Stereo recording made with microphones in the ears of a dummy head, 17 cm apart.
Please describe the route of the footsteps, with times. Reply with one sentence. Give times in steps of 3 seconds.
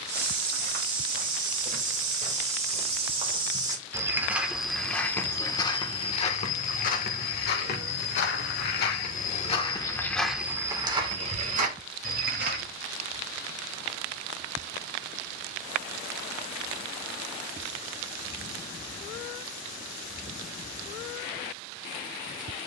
In this clip you hear the footsteps on the right from 0 s, in the centre from 3 s, on the left from 6 s, in the centre from 9 s, on the right from 12 s and not at all from 15 s.